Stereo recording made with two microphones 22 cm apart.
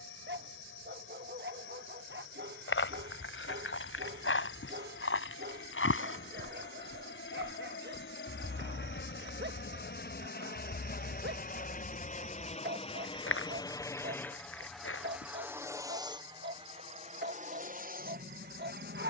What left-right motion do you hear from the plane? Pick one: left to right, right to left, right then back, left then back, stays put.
left to right.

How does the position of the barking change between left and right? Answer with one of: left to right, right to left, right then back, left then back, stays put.
stays put.